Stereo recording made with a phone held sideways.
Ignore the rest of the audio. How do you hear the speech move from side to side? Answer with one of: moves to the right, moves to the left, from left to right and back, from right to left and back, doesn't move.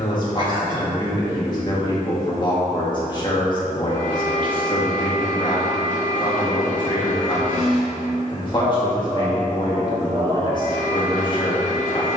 doesn't move.